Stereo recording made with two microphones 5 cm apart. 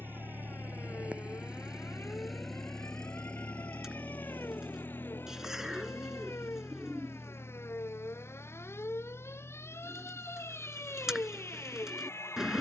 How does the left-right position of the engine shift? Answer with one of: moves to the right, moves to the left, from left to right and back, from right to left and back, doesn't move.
moves to the left.